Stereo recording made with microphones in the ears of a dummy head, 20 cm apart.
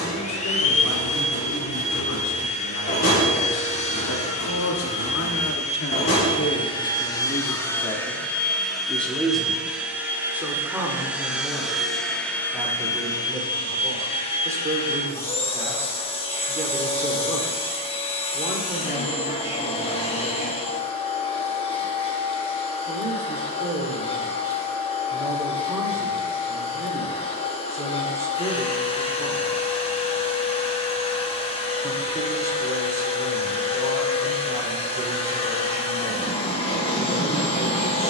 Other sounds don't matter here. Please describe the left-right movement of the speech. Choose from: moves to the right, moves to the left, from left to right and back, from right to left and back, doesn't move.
moves to the right.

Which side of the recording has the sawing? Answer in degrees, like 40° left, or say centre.
30° left.